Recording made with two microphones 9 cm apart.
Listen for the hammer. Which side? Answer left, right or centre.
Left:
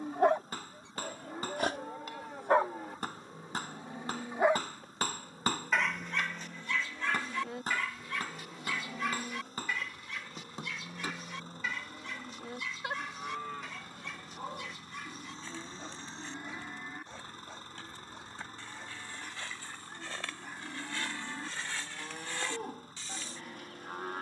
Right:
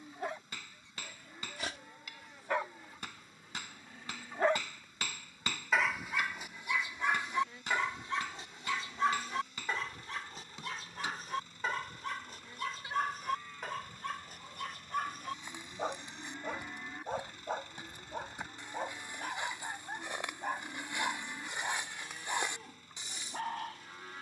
left.